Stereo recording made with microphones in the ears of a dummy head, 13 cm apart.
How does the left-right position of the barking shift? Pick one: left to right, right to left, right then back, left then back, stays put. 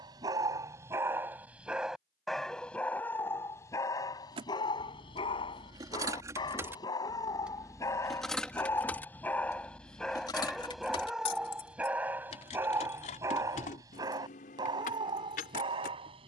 left then back.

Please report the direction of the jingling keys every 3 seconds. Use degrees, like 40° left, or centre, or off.
off, 30° right, 10° right, 30° left, 50° left, 60° left.